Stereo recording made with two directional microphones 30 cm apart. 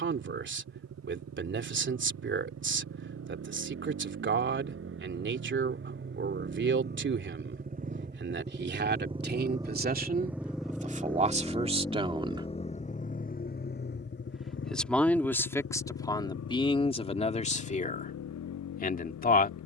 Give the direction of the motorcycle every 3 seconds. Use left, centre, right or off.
right, right, right, centre, left, left, left.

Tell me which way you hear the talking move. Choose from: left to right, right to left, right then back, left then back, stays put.
right to left.